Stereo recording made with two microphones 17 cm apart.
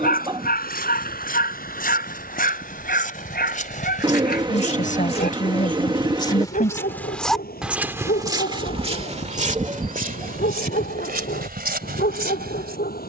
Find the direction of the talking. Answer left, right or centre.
left.